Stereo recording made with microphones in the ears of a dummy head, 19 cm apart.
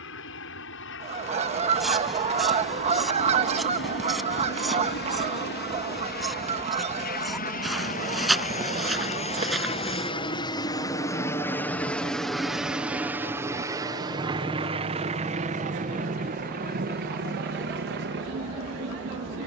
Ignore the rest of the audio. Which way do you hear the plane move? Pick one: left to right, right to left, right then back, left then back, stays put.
left to right.